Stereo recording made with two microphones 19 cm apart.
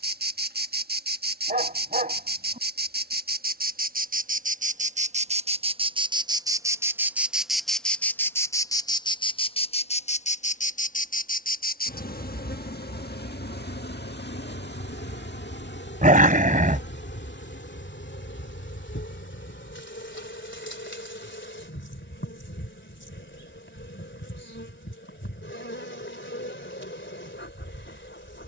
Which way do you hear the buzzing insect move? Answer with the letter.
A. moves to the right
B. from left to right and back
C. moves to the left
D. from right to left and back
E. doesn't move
C.